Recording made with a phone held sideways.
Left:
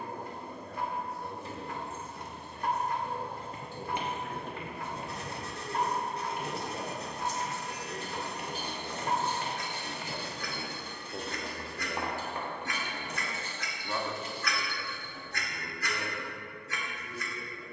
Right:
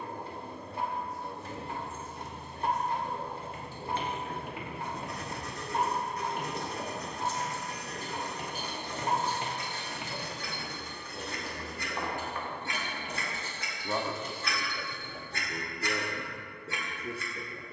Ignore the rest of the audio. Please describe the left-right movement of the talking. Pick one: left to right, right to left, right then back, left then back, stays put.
left to right.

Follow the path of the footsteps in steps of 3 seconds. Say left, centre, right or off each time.
off, centre, right, centre, left, off.